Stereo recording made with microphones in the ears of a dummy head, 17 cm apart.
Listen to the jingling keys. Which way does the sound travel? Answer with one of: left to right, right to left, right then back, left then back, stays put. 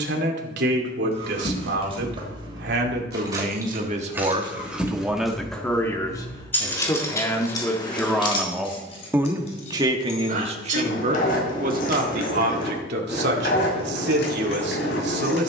right to left.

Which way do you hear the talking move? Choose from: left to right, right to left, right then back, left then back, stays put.
left then back.